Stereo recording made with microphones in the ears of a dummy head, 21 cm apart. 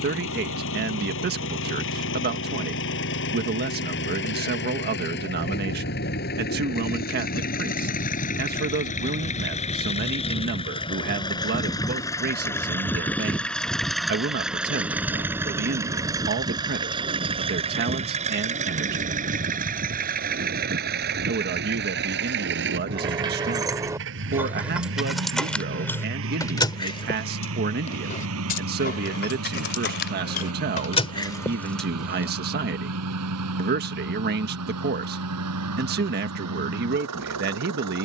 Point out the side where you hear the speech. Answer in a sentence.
In this clip you hear the speech on the right.